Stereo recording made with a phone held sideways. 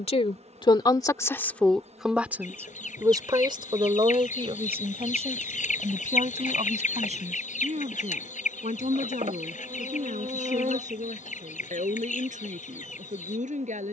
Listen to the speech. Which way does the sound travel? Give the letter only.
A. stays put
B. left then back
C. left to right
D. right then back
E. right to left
C.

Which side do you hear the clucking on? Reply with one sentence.
You can hear the clucking on the left.